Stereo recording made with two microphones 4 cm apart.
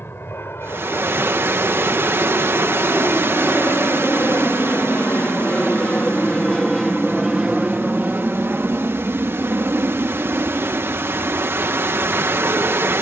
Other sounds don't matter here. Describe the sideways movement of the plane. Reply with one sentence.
You can hear the plane travel towards the right.